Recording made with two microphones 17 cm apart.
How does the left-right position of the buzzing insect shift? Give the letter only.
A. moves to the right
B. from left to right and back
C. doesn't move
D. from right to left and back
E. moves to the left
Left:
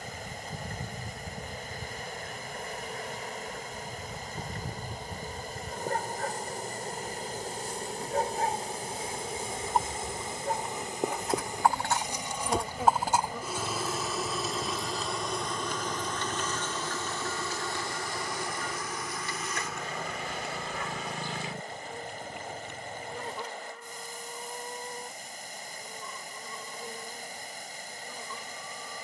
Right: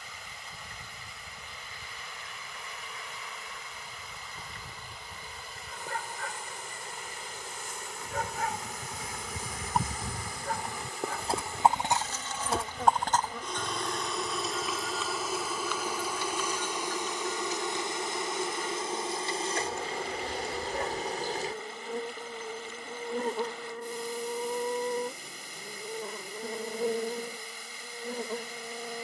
A.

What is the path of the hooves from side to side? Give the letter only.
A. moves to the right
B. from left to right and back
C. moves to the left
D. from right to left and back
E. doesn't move
C.